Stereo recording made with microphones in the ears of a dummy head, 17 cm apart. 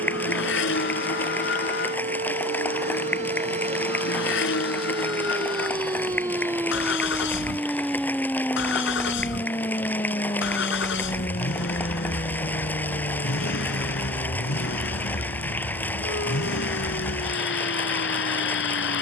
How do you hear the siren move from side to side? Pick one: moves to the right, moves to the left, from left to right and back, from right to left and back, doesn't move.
moves to the left.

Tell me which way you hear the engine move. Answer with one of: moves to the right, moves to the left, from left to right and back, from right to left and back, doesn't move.
doesn't move.